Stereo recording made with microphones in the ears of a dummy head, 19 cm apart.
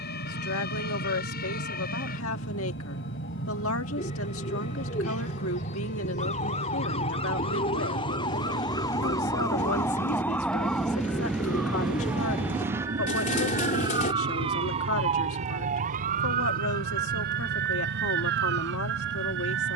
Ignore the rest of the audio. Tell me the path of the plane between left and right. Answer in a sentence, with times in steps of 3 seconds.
You can hear the plane on the left from 0 s, in the centre from 9 s and on the right from 12 s.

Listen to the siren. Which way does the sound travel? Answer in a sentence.
You can hear the siren go from the left side to the right.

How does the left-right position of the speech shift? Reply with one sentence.
In this clip you hear the speech stay in one place.